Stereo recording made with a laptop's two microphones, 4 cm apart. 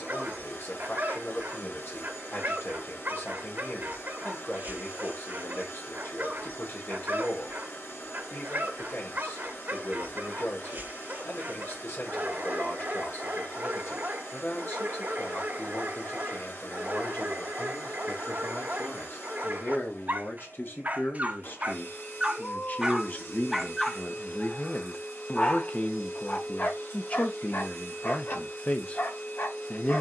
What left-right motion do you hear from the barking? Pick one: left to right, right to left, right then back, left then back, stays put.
right to left.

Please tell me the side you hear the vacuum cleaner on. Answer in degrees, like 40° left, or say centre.
60° left.